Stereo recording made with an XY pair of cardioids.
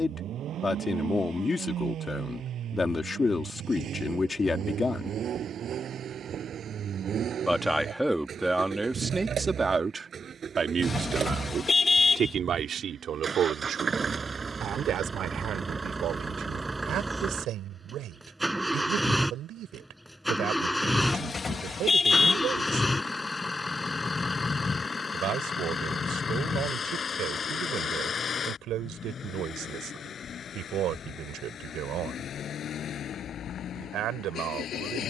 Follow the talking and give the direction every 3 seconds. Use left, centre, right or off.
left, left, centre, right, right, right, right, right, right, right, right, right.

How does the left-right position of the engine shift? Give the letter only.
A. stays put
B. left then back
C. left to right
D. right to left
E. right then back
D.